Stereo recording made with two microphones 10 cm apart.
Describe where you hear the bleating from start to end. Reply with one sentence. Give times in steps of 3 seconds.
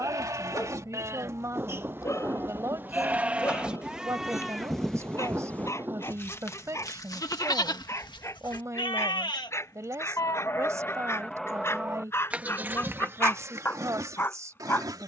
You can hear the bleating on the right from 0 s, in the centre from 3 s, on the left from 6 s and on the right from 12 s.